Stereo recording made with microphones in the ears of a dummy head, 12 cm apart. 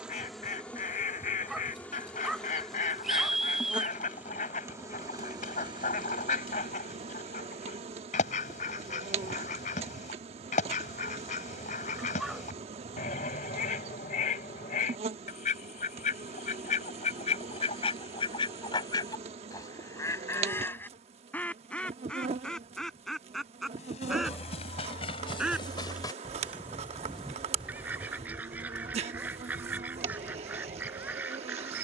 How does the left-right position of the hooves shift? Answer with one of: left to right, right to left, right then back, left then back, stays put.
left to right.